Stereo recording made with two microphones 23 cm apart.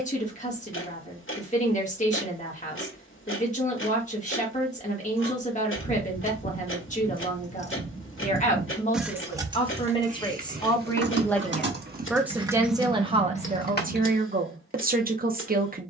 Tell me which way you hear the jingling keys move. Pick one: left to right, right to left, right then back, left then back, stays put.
right then back.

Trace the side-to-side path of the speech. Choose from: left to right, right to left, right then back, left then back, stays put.
left to right.